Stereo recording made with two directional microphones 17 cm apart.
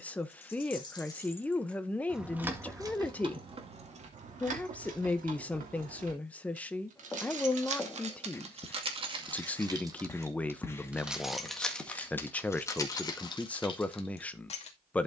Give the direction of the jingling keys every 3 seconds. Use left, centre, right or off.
centre, right, right, centre, left.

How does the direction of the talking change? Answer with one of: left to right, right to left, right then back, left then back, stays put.
stays put.